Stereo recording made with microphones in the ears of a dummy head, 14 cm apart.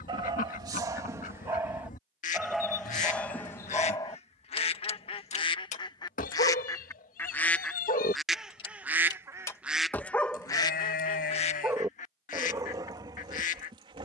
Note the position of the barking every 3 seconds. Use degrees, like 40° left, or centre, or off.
20° right, 20° left, 50° left, centre, 30° right.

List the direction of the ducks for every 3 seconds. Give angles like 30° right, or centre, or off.
50° left, 40° left, 10° left, 20° left, 50° left.